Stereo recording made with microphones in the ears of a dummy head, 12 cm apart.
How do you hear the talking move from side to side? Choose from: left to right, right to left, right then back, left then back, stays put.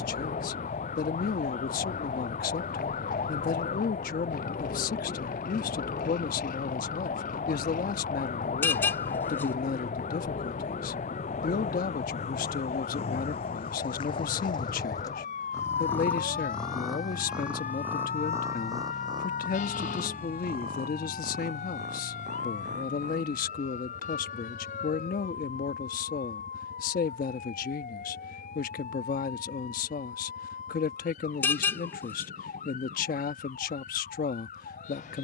stays put.